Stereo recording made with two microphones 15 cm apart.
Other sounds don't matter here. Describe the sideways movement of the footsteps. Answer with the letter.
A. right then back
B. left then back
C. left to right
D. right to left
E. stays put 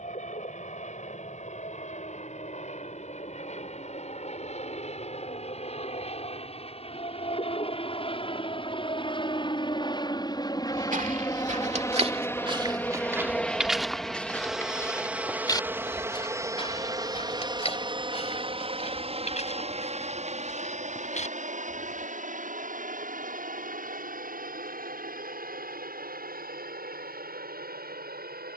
D.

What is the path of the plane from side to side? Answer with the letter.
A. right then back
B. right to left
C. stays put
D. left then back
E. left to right
E.